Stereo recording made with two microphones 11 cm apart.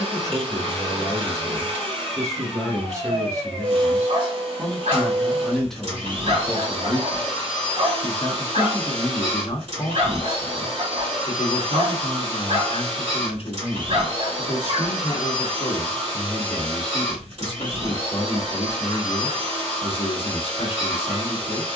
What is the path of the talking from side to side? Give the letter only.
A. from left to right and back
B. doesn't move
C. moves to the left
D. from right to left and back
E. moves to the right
C.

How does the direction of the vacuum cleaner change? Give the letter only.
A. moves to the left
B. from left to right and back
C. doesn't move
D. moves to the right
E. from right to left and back
C.